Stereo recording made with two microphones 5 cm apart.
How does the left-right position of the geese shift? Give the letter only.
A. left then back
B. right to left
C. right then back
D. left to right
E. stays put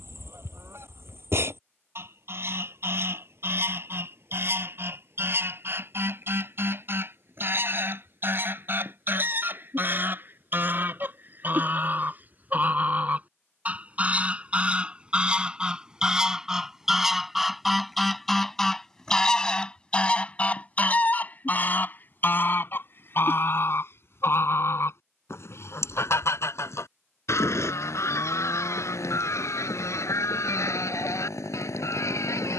B.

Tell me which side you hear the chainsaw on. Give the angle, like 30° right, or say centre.
80° left.